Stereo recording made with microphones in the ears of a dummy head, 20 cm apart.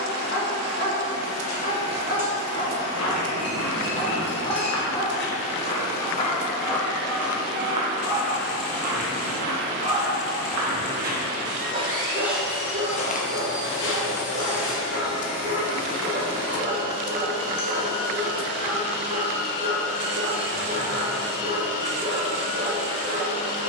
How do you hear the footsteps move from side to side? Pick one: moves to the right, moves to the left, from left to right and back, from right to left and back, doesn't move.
from left to right and back.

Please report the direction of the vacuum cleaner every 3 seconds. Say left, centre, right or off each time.
left, left, left, centre, left, left, left, left.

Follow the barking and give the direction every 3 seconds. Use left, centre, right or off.
left, left, centre, right, right, right, right, right.